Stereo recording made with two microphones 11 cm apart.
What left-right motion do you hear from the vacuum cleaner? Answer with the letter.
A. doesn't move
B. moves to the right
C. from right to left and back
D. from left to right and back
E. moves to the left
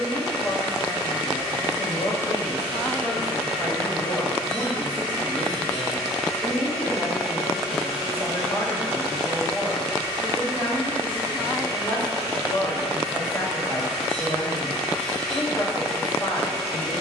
D.